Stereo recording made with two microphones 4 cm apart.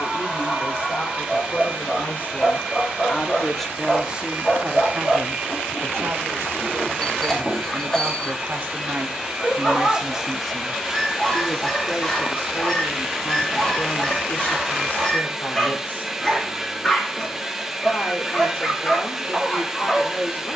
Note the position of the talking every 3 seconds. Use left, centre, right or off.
left, right, right, centre, left, left, left.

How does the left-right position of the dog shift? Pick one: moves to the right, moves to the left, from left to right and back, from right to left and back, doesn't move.
doesn't move.